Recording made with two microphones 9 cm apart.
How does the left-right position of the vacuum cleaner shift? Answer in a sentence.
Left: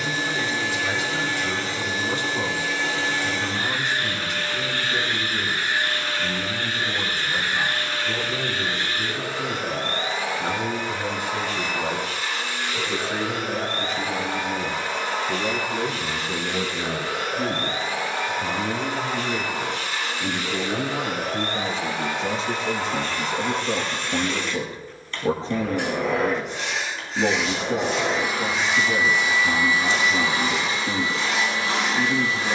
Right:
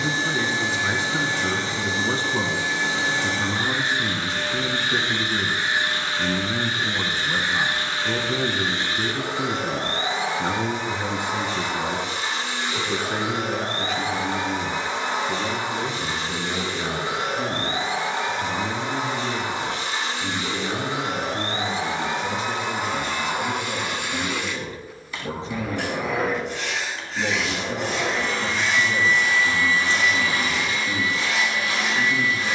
You can hear the vacuum cleaner go from the right side to the left.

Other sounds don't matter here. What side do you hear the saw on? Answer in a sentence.
You can hear the saw in the centre.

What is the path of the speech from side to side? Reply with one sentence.
You can hear the speech travel towards the left.